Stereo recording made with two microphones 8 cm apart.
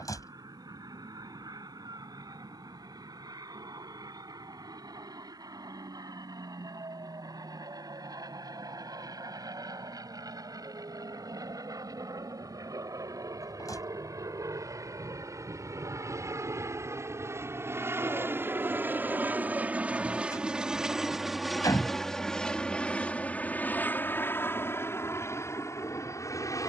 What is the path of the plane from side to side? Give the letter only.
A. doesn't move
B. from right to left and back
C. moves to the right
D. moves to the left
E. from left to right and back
D.